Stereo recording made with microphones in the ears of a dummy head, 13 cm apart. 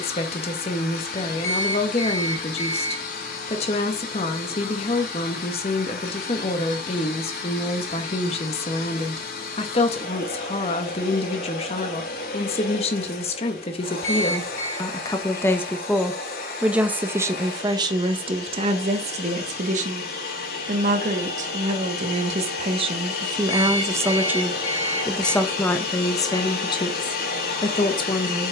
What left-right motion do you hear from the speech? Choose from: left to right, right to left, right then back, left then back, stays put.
right then back.